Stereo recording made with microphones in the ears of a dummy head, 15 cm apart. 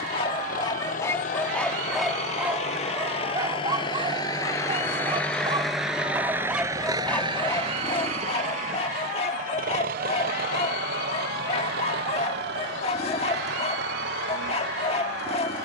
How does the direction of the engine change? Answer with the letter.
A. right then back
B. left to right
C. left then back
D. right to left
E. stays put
B.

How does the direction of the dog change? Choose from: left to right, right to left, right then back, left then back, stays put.
right then back.